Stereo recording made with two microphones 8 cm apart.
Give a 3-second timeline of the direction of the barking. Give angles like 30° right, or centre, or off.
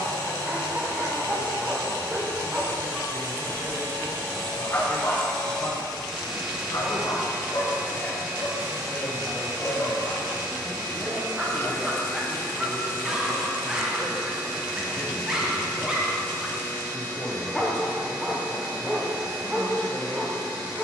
20° right, 20° left, 50° left, 10° left, 10° right, 10° right, 10° right.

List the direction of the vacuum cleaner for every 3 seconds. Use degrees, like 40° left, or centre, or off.
30° left, 20° left, 20° right, 50° right, 60° right, 60° right, 60° right.